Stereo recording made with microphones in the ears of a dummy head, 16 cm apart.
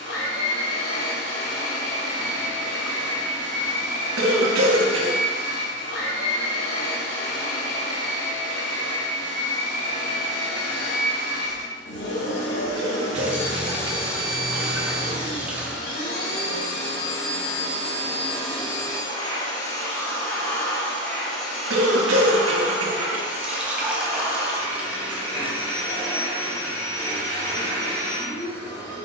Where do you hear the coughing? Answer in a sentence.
You can hear the coughing on the right.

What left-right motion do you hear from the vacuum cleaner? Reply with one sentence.
In this clip you hear the vacuum cleaner go from the left side to the right.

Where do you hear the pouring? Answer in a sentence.
You can hear the pouring in the centre.